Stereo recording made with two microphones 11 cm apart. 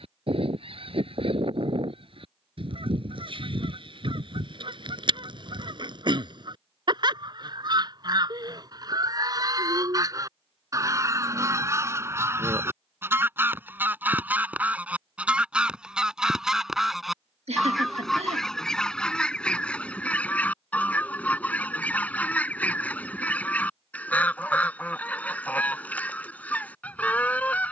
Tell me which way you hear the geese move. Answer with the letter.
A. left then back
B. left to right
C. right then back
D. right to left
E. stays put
D.